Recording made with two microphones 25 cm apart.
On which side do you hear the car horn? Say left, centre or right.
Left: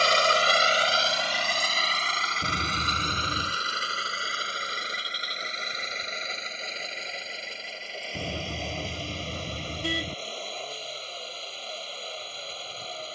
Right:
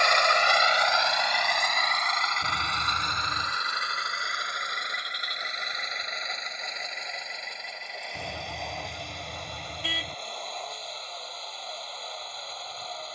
left.